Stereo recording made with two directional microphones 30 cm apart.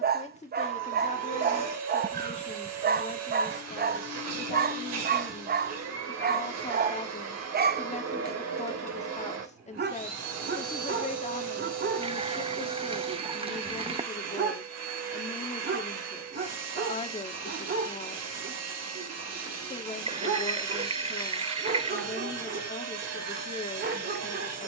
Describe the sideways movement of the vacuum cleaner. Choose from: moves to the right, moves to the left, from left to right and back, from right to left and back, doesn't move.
doesn't move.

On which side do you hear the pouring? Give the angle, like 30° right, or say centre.
20° right.